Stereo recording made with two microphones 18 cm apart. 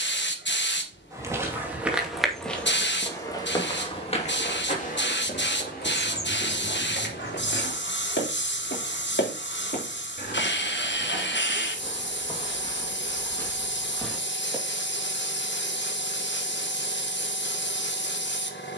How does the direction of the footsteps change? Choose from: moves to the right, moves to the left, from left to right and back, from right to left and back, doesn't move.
from right to left and back.